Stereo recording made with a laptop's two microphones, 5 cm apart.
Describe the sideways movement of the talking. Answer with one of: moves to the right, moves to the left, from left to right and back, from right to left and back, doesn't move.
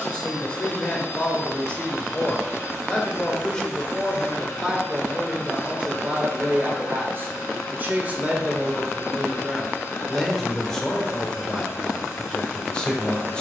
from left to right and back.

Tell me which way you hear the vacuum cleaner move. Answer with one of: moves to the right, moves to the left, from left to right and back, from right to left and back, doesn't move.
doesn't move.